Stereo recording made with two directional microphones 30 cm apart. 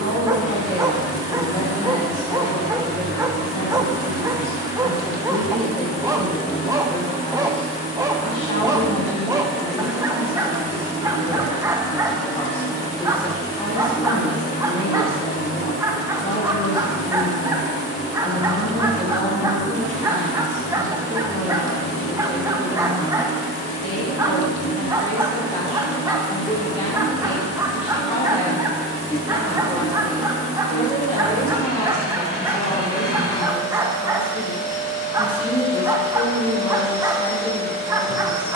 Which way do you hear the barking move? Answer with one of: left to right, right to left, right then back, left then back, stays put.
stays put.